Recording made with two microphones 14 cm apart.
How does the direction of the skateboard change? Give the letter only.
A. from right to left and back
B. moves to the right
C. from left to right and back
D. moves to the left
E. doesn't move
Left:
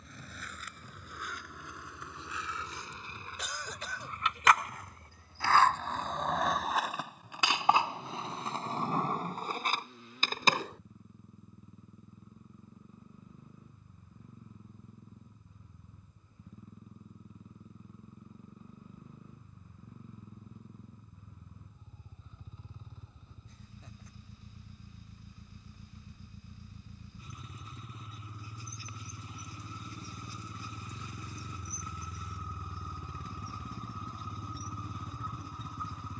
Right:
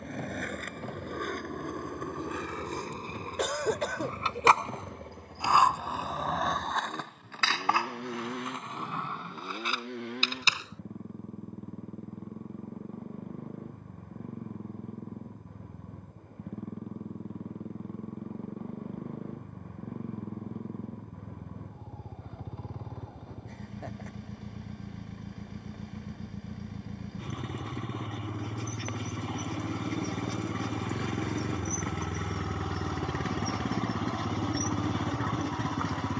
D.